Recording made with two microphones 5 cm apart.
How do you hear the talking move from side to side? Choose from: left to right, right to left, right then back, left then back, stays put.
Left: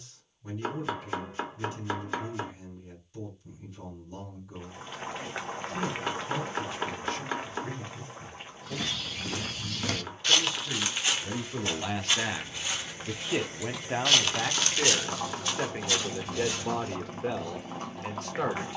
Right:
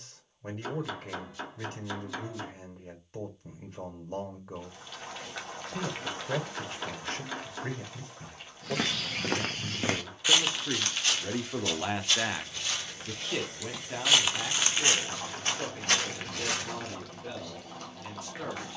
right to left.